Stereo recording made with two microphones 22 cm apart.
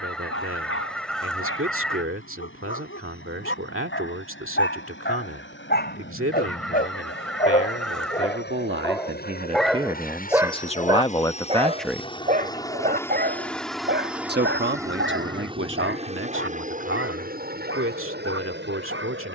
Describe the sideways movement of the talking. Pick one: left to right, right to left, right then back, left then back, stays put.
left then back.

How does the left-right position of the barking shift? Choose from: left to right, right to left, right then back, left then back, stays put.
left to right.